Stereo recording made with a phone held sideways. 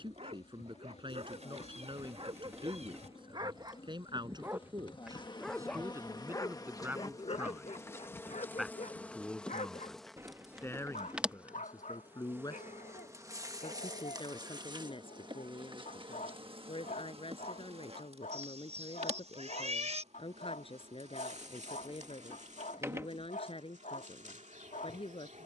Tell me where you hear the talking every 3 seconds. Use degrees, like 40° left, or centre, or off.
40° right, 30° right, 10° right, 20° left, 40° left, 40° left, 40° left, 40° left, 40° left.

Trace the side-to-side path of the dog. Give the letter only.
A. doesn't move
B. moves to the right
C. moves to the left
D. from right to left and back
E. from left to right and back
C.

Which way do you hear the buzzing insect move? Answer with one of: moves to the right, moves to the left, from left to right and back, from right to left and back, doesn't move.
moves to the right.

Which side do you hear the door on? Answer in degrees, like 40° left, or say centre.
20° right.